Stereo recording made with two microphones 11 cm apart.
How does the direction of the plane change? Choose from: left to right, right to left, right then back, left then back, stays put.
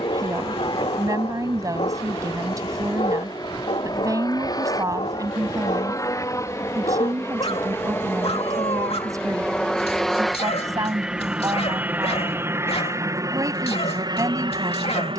left to right.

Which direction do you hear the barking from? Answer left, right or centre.
left.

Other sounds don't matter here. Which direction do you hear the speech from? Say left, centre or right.
right.